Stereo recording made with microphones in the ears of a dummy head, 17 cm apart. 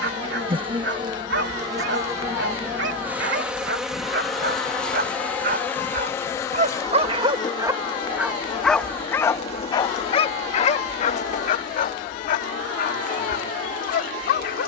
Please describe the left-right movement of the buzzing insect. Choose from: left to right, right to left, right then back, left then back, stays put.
right to left.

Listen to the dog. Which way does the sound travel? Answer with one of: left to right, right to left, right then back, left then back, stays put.
right to left.